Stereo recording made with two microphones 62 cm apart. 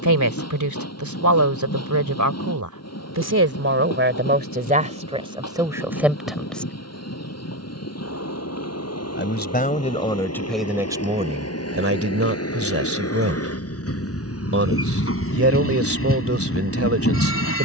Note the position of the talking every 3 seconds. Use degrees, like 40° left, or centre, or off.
30° right, 10° right, centre, centre, 20° right, 20° right.